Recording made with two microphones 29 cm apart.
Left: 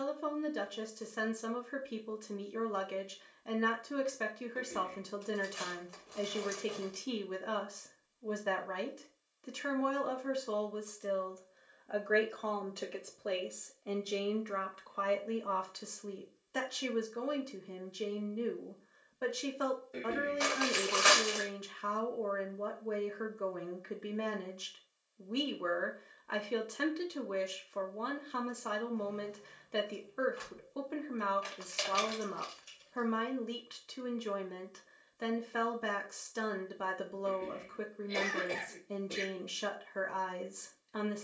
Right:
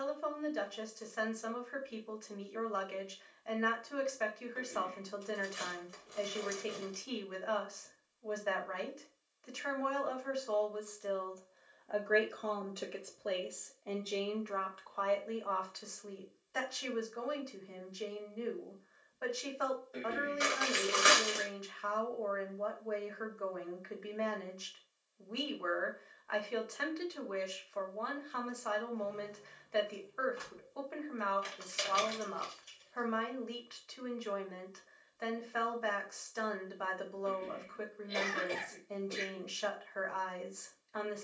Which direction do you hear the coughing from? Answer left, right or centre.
left.